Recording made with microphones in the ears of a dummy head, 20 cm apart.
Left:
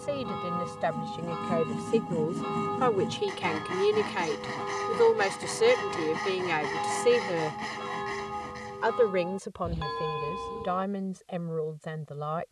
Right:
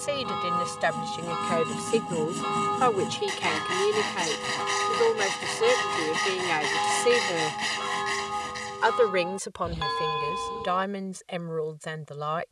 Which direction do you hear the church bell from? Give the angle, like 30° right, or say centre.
50° right.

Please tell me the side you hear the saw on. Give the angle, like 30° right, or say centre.
70° right.